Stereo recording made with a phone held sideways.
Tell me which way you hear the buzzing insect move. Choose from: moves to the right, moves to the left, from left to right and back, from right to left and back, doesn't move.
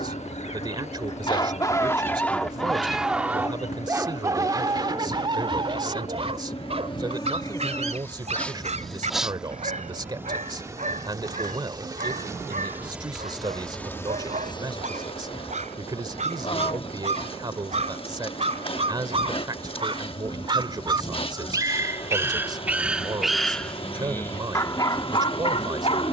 from left to right and back.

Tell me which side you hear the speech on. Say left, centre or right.
right.